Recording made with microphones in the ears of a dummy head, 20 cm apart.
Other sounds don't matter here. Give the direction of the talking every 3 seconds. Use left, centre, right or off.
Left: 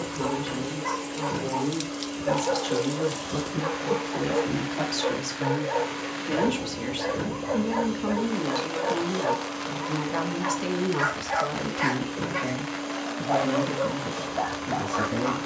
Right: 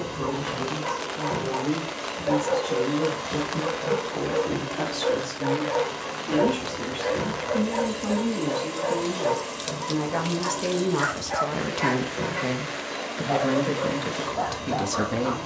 left, left, left, centre, right.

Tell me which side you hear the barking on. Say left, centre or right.
left.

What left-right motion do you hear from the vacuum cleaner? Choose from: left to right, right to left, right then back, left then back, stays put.
stays put.